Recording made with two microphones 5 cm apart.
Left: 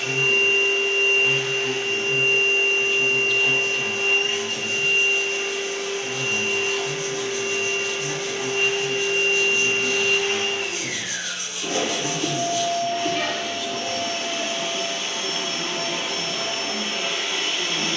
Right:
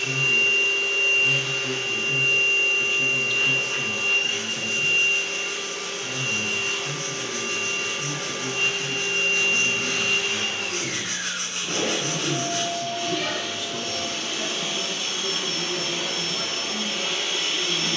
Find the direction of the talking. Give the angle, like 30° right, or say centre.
centre.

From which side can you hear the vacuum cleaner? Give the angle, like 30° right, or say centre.
60° left.